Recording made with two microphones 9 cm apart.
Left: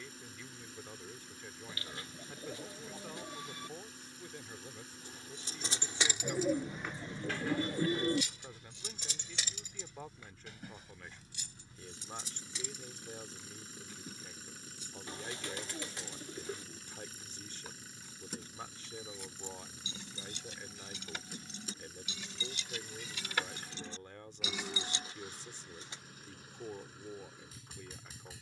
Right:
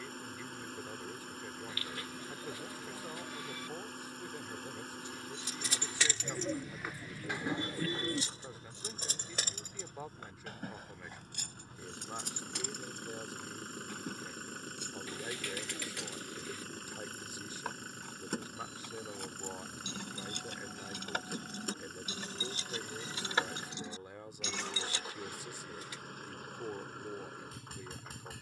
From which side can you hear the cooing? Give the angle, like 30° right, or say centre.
20° left.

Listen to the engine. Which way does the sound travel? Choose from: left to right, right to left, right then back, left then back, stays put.
stays put.